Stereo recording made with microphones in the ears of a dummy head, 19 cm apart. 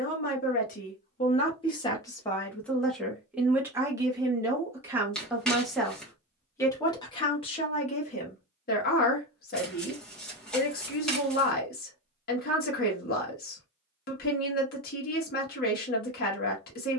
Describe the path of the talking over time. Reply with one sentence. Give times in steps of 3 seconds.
You can hear the talking on the left from 0 s, in the centre from 3 s and on the left from 6 s.